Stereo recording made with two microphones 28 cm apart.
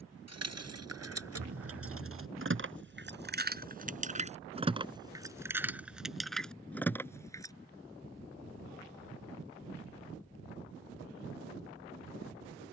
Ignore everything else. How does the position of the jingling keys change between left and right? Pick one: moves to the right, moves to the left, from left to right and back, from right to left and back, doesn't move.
moves to the left.